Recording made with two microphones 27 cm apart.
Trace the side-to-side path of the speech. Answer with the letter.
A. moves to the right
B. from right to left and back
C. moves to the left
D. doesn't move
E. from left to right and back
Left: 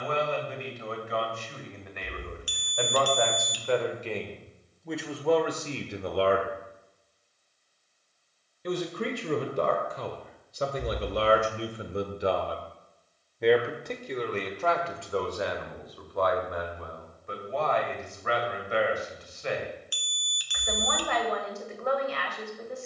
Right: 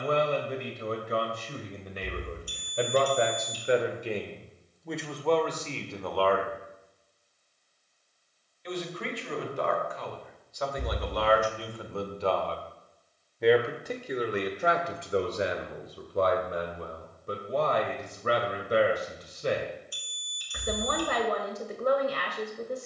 B.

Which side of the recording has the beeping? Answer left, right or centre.
left.